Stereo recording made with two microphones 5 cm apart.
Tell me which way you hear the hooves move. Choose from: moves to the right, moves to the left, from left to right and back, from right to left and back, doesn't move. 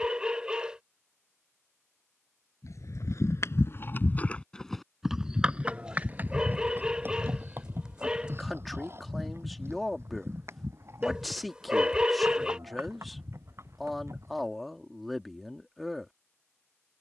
moves to the right.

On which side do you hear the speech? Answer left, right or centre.
centre.